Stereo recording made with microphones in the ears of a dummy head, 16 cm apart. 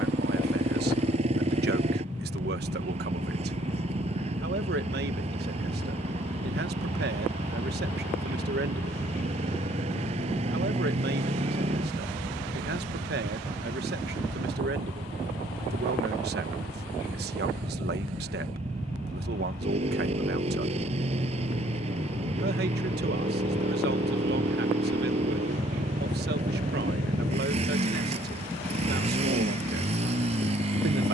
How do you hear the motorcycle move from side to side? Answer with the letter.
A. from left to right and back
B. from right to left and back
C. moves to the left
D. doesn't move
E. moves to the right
D.